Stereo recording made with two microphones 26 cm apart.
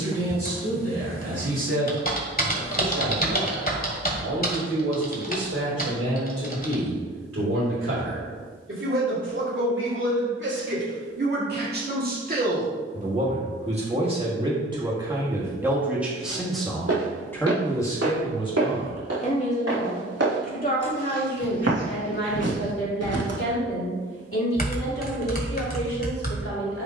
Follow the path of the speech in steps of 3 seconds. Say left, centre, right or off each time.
right, right, right, right, right, centre, left, left, left.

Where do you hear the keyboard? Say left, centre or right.
left.